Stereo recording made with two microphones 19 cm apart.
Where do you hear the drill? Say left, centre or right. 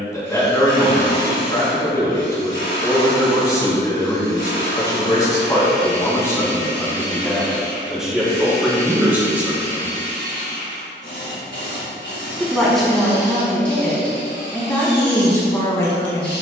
left.